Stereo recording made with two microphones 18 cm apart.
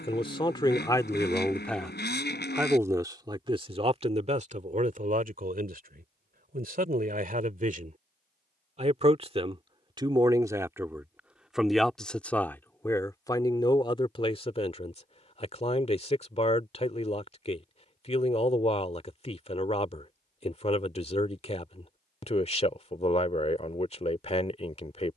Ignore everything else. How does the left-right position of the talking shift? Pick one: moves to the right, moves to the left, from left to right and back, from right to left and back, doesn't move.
from left to right and back.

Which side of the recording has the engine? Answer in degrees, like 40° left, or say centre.
70° left.